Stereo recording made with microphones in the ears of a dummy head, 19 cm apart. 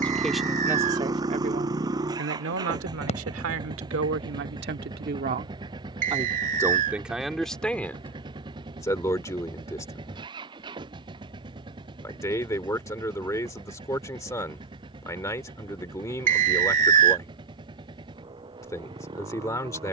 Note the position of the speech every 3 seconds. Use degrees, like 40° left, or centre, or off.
30° right, 60° right, centre, 20° left, 20° left, 20° left, 20° left.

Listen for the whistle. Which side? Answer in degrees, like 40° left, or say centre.
40° right.